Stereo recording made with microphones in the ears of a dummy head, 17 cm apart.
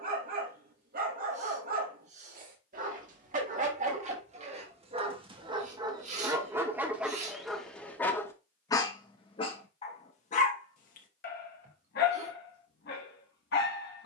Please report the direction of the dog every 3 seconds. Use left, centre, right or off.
right, right, centre, left, left.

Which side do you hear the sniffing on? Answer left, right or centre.
right.